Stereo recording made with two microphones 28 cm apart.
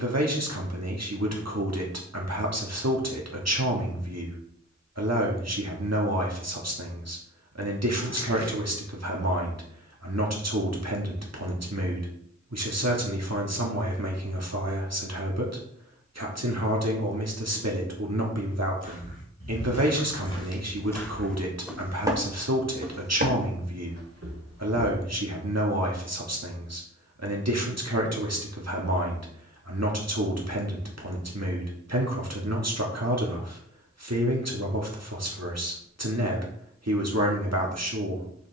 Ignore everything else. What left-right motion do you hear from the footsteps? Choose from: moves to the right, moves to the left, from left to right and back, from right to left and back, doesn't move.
moves to the right.